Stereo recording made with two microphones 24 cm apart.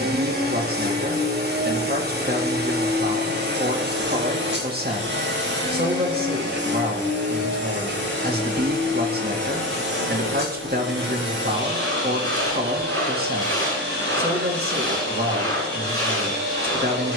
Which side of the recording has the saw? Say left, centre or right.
right.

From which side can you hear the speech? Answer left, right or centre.
right.